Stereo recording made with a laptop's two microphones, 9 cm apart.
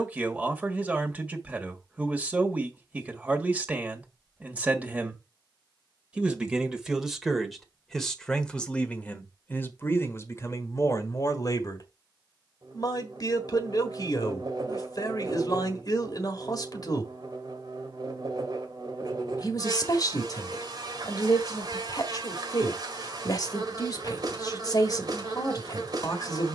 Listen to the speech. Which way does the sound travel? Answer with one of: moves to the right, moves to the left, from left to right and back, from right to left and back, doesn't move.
moves to the left.